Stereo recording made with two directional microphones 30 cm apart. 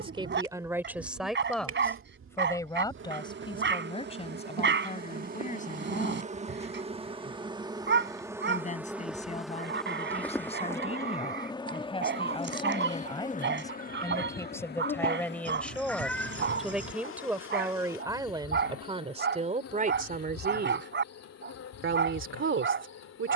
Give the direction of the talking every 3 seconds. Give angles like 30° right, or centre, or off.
centre, 20° left, 20° left, 20° left, 10° left, centre, 20° right, 40° right.